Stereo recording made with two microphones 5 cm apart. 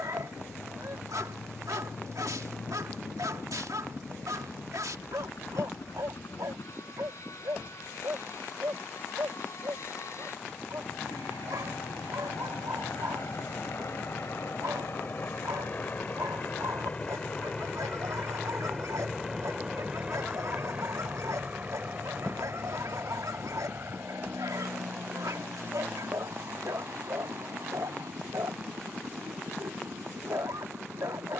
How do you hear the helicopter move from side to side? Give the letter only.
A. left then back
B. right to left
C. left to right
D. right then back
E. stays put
C.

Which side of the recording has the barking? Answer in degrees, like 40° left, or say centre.
80° right.